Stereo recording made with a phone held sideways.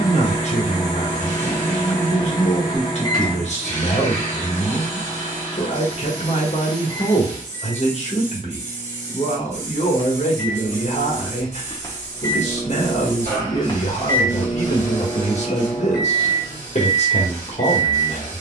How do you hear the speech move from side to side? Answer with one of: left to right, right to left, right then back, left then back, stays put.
stays put.